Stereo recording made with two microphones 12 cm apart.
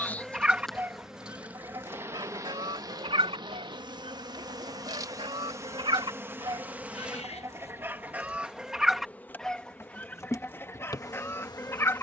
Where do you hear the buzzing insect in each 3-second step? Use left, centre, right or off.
centre, right, centre, left.